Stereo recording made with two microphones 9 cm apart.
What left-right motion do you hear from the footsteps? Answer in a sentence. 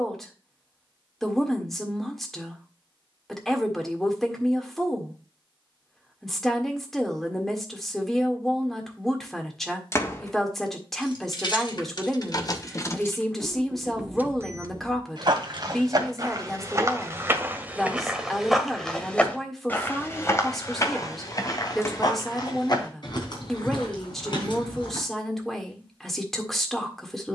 You can hear the footsteps move from right to left.